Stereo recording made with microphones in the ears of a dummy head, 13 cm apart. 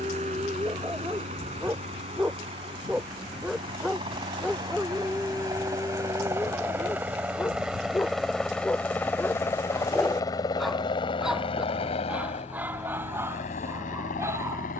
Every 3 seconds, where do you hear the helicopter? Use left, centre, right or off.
right, right, centre, left, left.